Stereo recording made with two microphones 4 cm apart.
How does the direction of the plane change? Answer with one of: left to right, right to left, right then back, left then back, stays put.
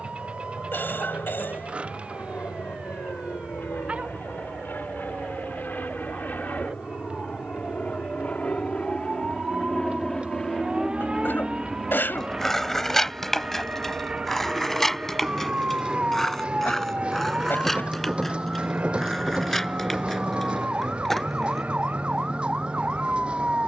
left to right.